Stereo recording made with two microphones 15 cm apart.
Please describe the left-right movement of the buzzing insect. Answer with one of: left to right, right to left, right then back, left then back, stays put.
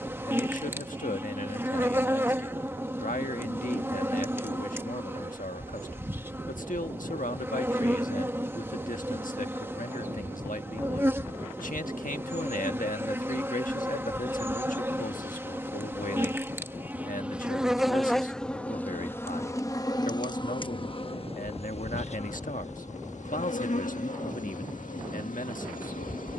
right to left.